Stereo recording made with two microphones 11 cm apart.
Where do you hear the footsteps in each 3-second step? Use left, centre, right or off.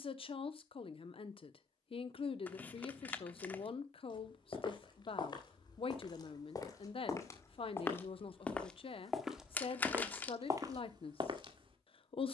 off, left, left, right.